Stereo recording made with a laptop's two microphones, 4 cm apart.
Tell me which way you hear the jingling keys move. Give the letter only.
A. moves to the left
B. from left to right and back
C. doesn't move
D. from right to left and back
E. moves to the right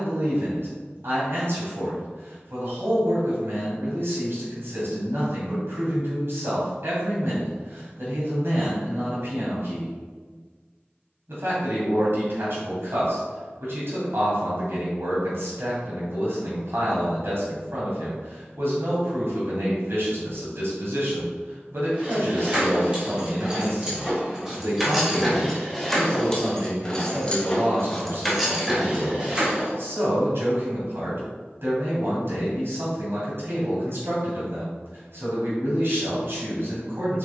D.